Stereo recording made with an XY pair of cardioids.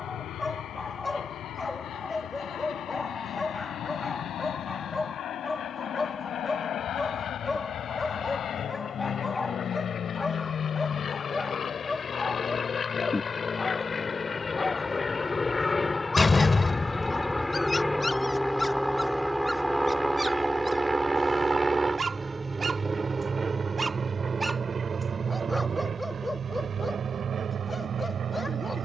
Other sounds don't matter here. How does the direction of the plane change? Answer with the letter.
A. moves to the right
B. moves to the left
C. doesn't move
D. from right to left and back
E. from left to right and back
A.